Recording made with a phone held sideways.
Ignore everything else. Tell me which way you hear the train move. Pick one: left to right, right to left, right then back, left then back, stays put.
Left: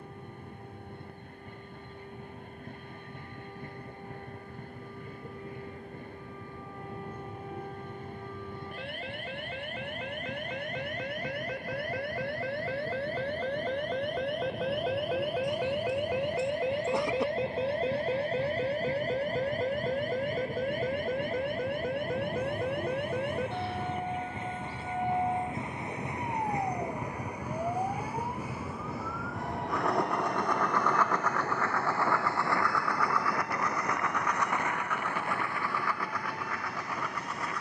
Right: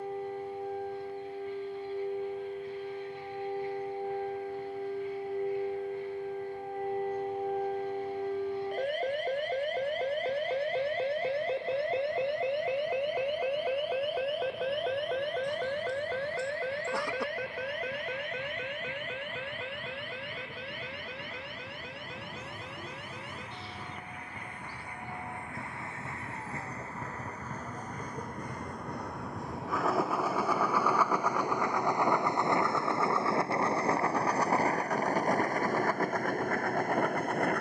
left to right.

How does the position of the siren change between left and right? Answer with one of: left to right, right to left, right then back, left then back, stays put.
right to left.